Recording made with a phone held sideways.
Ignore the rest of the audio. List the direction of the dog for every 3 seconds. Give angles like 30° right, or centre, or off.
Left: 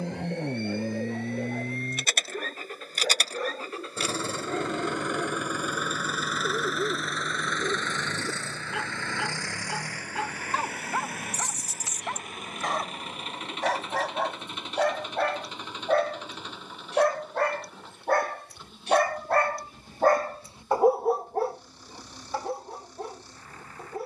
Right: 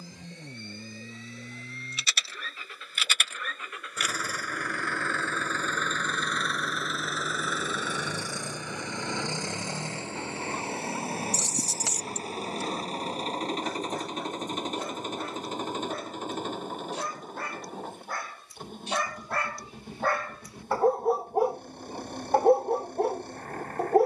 80° left, 80° left, 80° left, 80° left, 70° left, 70° left, 40° left, 40° right.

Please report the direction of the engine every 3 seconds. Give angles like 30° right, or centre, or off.
50° left, 20° left, centre, 20° right, 40° right, 40° right, 50° right, 50° right.